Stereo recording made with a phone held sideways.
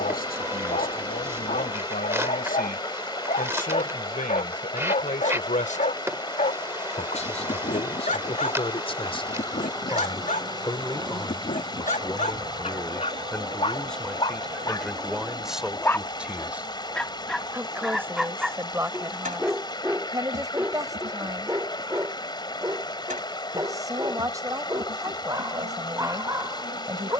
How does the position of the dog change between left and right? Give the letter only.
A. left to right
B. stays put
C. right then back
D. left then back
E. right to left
A.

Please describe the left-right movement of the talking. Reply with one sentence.
You can hear the talking move from left to right.